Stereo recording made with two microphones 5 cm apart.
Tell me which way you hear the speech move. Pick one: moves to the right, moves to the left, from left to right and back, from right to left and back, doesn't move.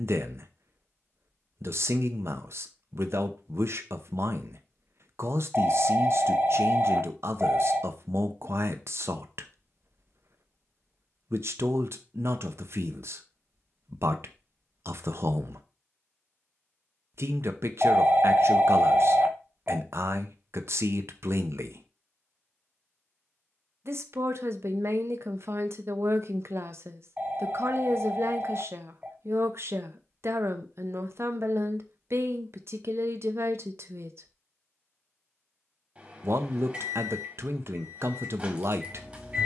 doesn't move.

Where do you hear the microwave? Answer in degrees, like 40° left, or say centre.
20° right.